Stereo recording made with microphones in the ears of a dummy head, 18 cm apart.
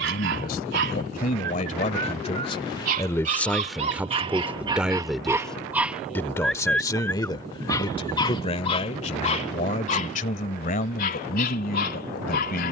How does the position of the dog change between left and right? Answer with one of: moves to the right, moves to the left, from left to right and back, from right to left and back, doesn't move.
moves to the left.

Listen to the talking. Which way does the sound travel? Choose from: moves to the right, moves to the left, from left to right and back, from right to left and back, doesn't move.
from left to right and back.